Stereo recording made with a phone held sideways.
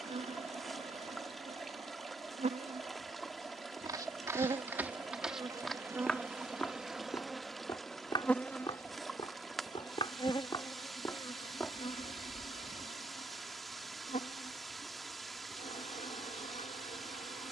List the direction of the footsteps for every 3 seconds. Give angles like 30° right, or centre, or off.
off, 10° right, 20° left, 30° left, 10° right, off.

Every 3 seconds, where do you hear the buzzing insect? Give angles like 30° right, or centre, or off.
50° right, 30° right, centre, 30° left, 50° left, 60° left.